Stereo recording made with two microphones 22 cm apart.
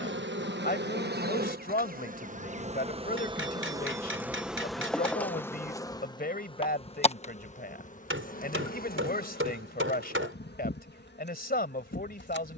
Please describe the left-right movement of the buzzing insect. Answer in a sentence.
In this clip you hear the buzzing insect go from the right side to the left.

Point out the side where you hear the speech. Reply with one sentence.
In this clip you hear the speech on the left.